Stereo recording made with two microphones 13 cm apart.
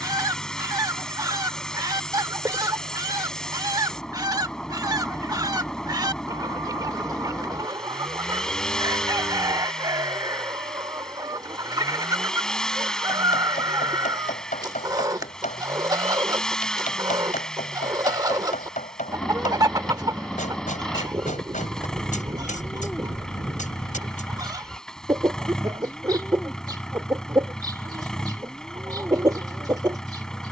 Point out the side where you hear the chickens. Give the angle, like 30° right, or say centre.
30° right.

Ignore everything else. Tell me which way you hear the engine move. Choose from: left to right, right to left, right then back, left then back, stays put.
stays put.